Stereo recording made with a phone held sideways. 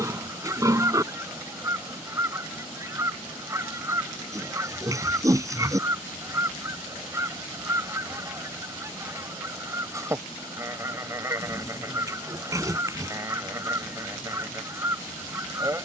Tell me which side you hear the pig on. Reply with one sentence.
You can hear the pig on the right.